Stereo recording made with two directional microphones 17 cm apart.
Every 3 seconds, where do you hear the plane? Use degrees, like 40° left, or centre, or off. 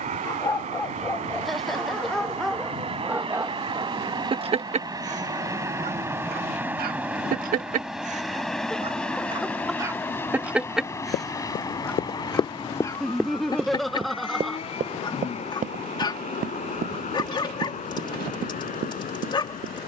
40° right, 20° right, centre, 10° left, 30° left, 40° left, 50° left.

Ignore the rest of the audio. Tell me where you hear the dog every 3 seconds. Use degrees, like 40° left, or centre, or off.
10° left, 30° right, 50° right, 10° right, 20° left, 30° left, 30° left.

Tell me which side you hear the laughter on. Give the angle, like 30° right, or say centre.
centre.